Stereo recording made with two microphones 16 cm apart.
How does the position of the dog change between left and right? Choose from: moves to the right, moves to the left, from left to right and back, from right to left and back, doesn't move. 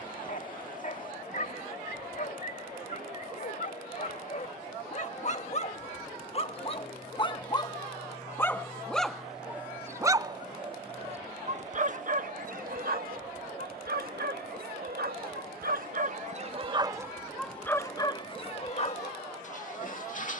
from left to right and back.